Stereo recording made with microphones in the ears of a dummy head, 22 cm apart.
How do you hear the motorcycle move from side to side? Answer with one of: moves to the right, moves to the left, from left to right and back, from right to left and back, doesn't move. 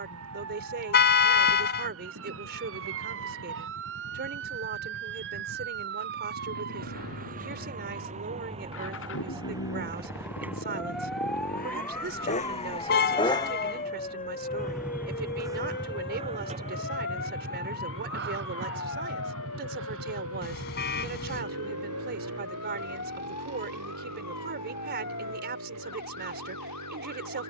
moves to the right.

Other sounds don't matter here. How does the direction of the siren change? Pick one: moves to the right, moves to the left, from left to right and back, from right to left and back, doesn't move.
moves to the left.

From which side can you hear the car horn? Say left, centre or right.
left.